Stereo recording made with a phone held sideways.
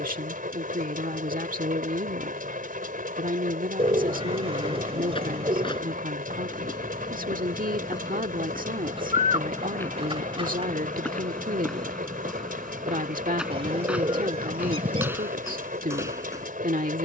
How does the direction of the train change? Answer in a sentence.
You can hear the train stay put.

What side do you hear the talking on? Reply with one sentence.
In this clip you hear the talking on the right.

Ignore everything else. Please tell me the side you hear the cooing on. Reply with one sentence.
In this clip you hear the cooing on the right.